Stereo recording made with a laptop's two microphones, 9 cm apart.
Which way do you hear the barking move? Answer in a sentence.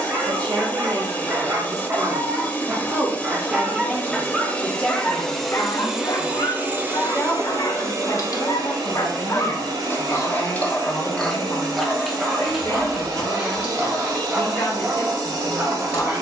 You can hear the barking move from right to left and back again.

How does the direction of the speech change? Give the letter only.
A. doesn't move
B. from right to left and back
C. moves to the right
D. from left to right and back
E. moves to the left
E.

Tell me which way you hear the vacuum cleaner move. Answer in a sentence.
In this clip you hear the vacuum cleaner move from left to right.